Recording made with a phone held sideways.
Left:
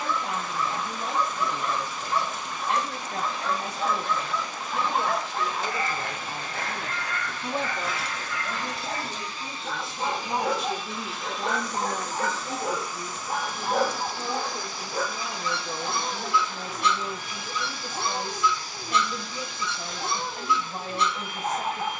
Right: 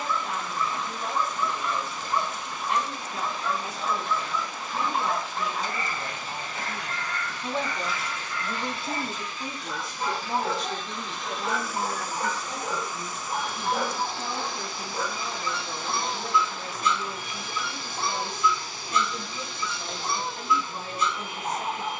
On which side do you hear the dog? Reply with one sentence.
In this clip you hear the dog on the left.